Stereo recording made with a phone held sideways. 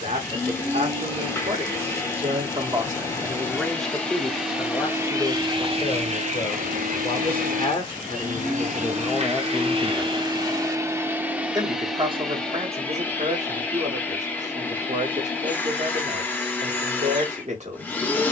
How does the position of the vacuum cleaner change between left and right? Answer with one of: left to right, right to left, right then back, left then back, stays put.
right then back.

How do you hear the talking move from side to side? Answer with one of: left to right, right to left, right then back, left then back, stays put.
left then back.